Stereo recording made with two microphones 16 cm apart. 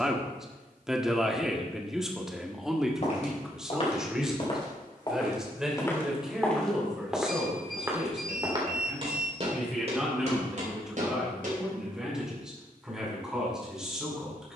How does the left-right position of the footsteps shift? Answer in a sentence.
In this clip you hear the footsteps move to the right.